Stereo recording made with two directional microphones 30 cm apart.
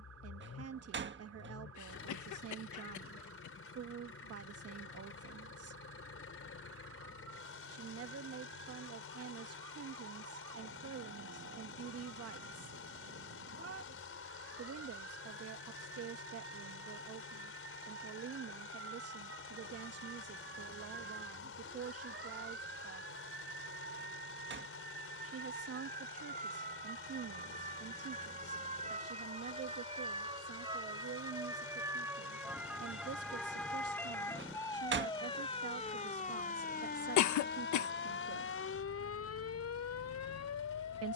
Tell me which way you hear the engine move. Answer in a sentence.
You can hear the engine stay put.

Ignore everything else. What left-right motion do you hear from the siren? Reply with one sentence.
In this clip you hear the siren move from right to left.